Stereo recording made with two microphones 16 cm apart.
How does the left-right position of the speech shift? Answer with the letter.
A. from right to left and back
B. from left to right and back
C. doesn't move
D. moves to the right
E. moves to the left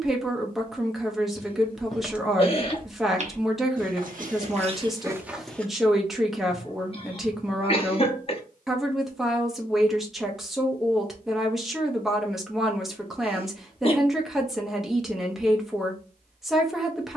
C.